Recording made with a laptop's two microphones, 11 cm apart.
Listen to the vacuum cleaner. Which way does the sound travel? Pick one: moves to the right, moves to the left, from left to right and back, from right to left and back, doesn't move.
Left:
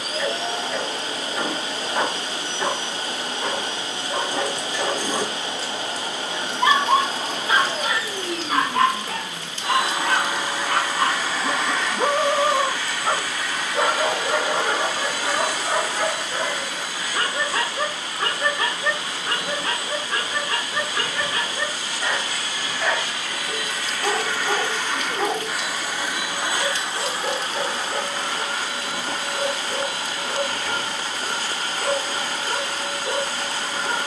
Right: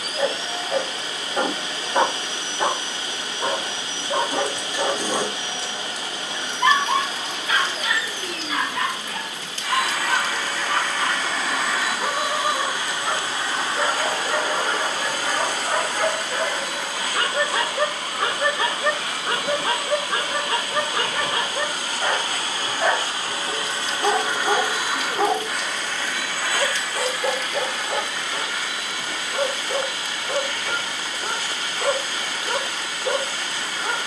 from left to right and back.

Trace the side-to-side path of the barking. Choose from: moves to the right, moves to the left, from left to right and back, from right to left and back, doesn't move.
from right to left and back.